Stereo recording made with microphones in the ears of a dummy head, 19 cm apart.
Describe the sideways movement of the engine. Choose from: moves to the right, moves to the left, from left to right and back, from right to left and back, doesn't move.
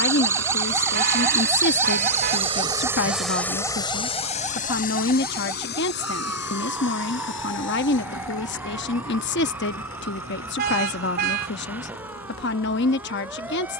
moves to the left.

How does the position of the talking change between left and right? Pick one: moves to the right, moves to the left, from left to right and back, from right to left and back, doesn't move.
doesn't move.